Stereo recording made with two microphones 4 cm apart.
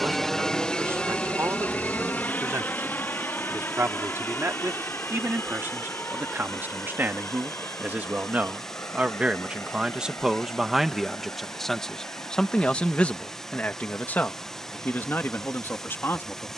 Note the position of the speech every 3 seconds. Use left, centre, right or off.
right, right, right, centre, left, left.